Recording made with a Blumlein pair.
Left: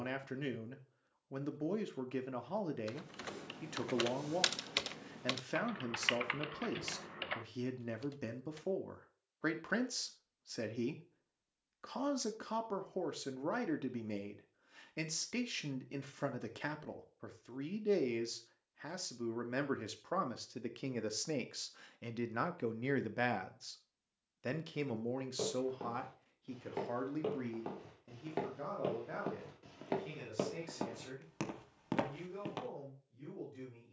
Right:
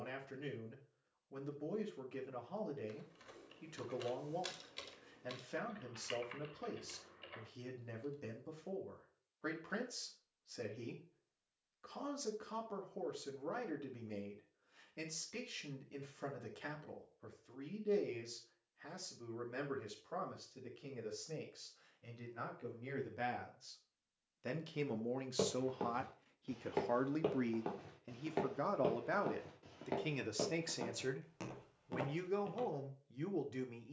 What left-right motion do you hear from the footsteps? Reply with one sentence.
In this clip you hear the footsteps go from the right side to the left.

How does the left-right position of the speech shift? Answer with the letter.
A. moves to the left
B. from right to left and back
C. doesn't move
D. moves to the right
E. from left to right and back
D.